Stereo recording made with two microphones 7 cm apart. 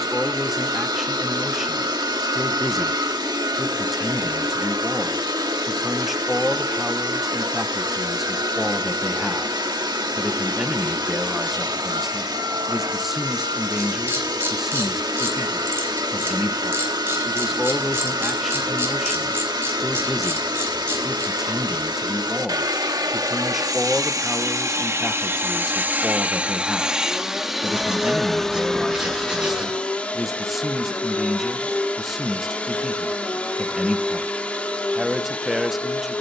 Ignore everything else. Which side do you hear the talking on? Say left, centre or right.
centre.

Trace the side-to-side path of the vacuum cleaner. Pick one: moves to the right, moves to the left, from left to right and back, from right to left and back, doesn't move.
moves to the left.